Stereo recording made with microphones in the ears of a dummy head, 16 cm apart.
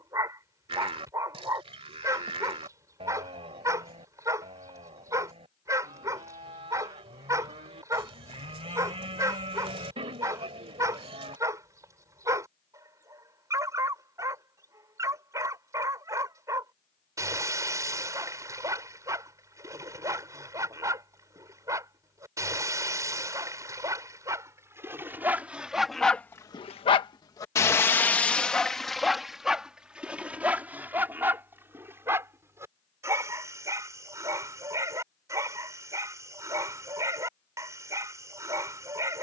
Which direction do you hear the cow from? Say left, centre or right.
right.